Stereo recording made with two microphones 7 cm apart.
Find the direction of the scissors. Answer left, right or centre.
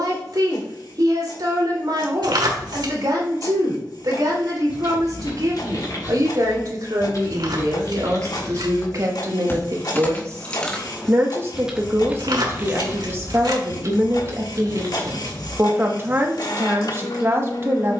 right.